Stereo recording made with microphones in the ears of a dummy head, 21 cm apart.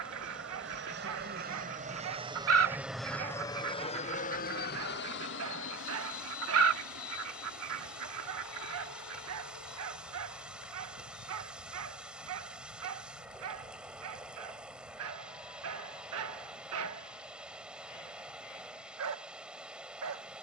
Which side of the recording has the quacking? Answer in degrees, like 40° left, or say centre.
60° right.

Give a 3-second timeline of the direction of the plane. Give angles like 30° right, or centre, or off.
40° right, 40° left, 60° left, 70° left, 80° left, 80° left, 80° left.